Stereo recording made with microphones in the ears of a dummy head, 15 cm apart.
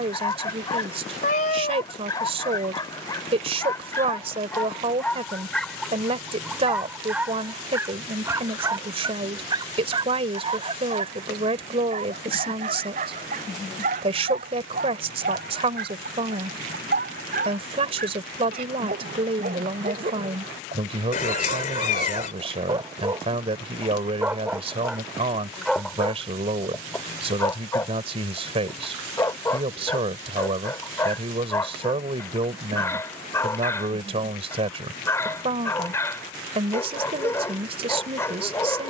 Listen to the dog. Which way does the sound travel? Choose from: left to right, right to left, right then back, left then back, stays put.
right then back.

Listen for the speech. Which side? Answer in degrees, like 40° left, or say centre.
40° right.